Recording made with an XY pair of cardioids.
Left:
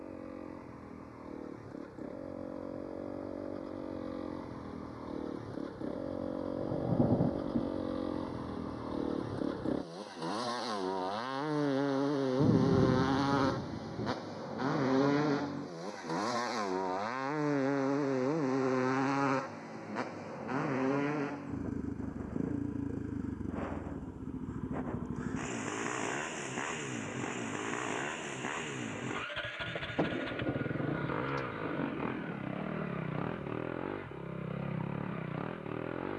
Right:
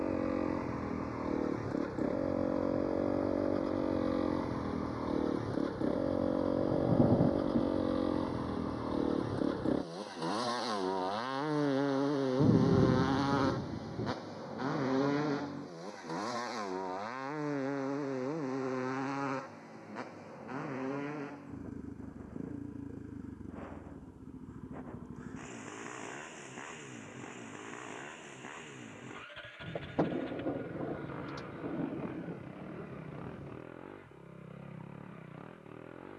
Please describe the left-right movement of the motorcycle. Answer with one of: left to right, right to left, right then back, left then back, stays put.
right to left.